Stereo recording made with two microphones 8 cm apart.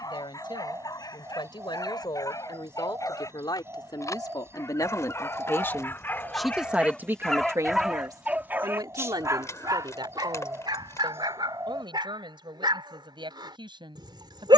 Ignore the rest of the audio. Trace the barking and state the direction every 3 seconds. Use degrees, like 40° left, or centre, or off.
50° left, 40° left, centre, 60° right, 70° right.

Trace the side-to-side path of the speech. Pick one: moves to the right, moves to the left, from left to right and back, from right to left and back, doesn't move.
moves to the right.